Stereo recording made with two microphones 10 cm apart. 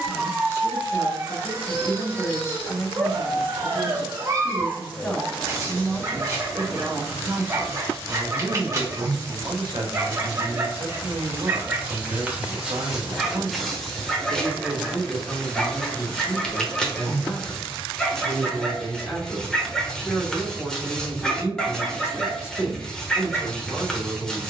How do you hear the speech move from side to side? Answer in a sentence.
In this clip you hear the speech move from left to right and back again.